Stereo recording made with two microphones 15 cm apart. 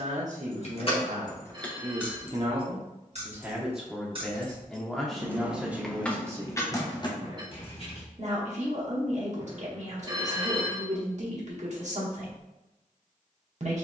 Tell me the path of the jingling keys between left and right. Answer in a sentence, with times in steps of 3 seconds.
You can hear the jingling keys in the centre from 0 s, on the right from 3 s, on the left from 6 s and not at all from 9 s.